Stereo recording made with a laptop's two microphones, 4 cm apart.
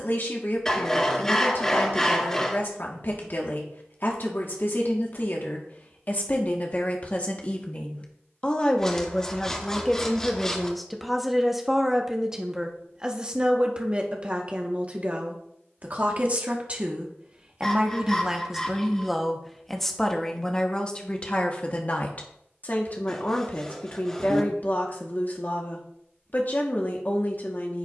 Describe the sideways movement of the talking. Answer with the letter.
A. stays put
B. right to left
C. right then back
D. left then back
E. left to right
C.